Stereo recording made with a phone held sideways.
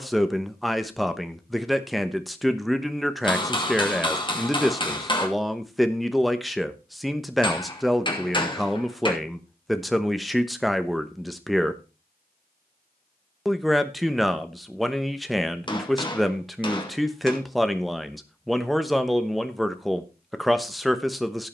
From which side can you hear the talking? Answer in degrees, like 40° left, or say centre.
centre.